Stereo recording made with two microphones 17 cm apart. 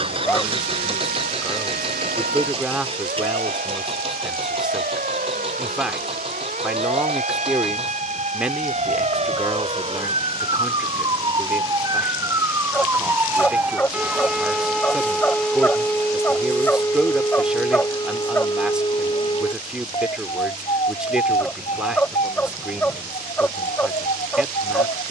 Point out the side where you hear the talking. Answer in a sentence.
You can hear the talking in the centre.